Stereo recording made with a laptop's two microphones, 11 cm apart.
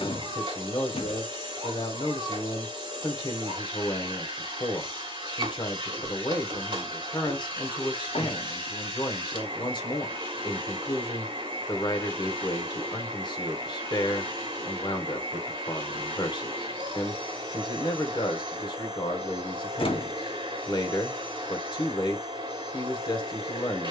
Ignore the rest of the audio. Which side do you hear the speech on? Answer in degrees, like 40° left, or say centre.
40° left.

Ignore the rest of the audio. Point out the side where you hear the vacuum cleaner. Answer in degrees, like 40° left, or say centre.
40° right.